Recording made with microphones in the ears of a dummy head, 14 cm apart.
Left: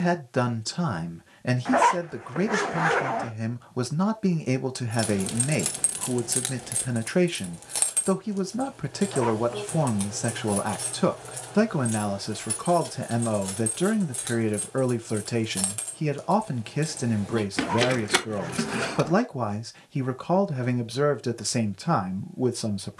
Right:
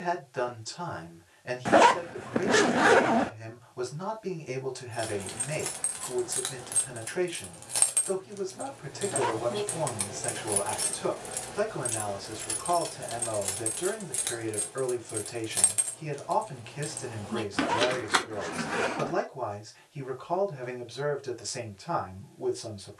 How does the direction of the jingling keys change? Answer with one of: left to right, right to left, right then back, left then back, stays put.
right then back.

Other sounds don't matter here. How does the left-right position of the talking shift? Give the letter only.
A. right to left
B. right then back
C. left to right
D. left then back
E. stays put
E.